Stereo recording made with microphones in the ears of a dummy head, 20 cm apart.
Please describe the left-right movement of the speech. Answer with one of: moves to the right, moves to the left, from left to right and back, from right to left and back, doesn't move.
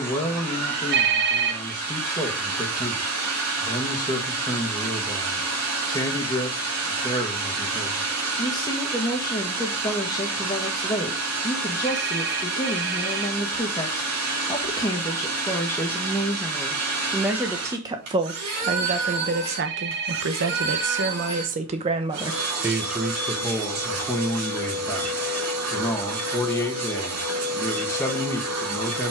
from left to right and back.